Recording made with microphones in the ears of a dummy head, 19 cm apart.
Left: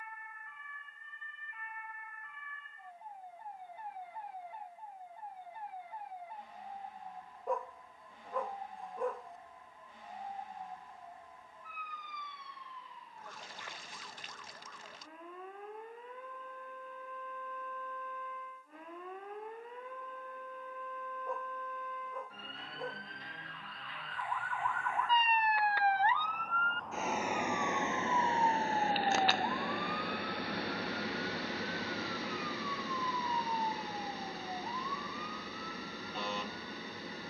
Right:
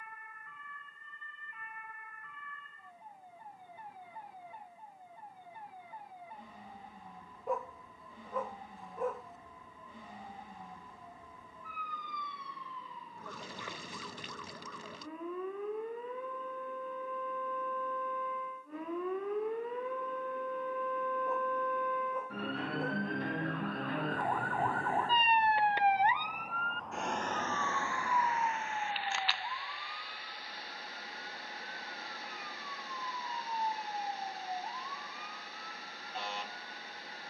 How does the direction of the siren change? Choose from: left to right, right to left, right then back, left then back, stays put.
right to left.